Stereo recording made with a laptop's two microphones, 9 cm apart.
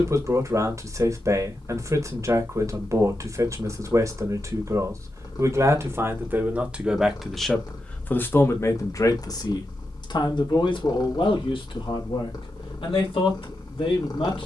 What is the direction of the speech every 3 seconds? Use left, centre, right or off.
right, right, centre, left, left.